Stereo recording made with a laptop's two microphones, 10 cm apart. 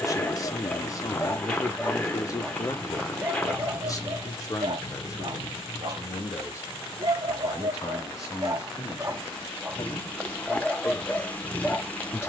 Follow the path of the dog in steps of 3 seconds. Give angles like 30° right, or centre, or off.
20° left, 40° right, 40° right, centre.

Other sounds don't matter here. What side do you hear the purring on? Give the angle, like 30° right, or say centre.
10° left.